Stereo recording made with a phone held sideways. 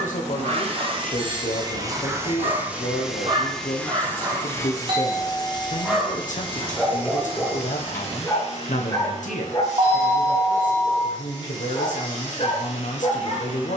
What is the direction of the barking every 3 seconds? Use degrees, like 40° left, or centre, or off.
50° right, 30° right, 10° left, 40° left, 50° left.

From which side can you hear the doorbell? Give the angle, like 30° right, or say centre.
40° right.